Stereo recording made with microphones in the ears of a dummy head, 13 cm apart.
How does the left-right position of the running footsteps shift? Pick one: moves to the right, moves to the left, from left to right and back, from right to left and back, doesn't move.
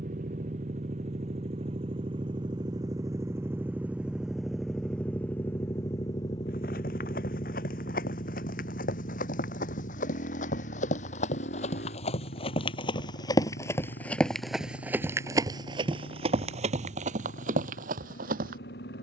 moves to the right.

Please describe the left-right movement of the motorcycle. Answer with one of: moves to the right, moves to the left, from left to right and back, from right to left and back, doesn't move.
moves to the left.